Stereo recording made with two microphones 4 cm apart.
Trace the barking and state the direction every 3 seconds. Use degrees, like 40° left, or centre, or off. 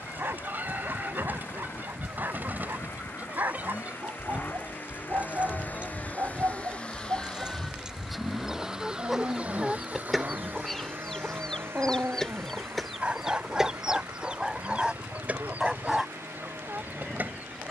60° right, 60° right, 60° right, 50° right, 20° right, centre.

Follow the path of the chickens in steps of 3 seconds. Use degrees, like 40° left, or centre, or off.
40° right, 40° right, 20° right, centre, 10° right, 40° right.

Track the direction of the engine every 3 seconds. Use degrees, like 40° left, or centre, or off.
60° left, 50° left, 10° left, 40° right, 70° right, 80° right.